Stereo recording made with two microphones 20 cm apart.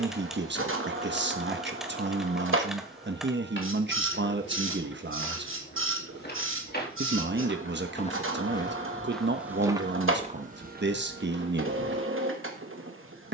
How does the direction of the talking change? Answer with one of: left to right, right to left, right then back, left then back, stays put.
stays put.